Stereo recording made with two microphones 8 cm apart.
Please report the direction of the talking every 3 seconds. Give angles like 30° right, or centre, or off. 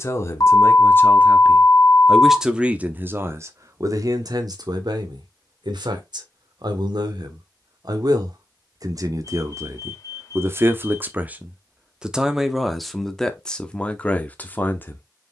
10° left, 50° right, 60° right, 30° right, 10° left.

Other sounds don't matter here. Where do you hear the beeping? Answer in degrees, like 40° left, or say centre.
50° left.